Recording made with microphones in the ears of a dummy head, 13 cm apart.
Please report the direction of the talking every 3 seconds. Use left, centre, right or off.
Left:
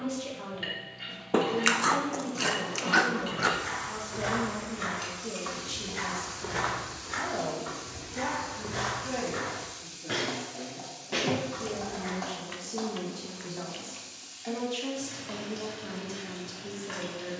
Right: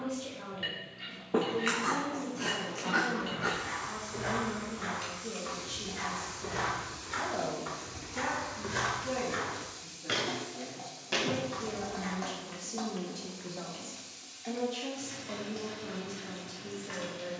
left, left, centre, right, centre, left.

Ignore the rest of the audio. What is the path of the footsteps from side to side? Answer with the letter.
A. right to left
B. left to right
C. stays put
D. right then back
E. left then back
B.